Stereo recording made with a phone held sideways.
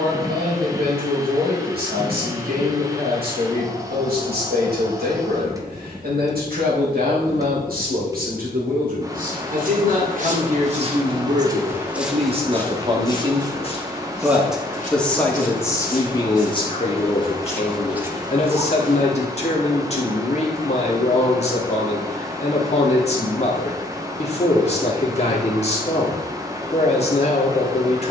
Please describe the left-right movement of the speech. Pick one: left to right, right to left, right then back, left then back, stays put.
right to left.